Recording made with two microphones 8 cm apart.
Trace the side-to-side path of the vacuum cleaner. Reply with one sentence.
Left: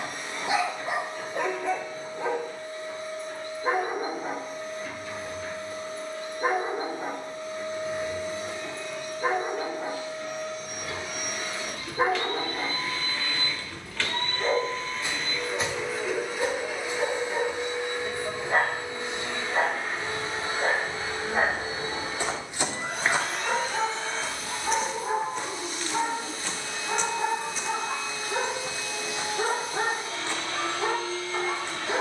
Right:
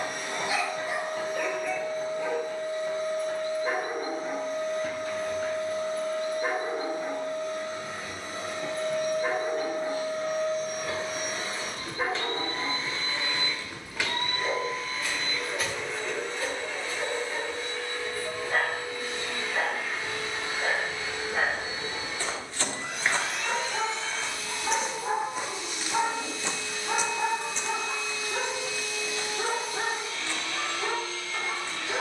You can hear the vacuum cleaner move from right to left.